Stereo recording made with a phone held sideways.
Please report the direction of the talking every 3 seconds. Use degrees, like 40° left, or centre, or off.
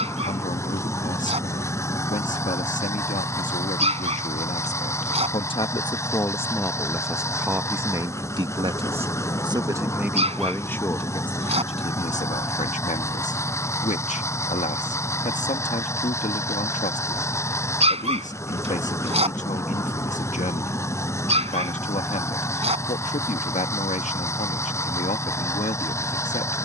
50° left, 40° left, 10° right, 10° left, 50° left, 50° left, 50° left, 50° left, 50° left.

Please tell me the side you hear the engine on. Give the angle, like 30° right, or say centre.
20° left.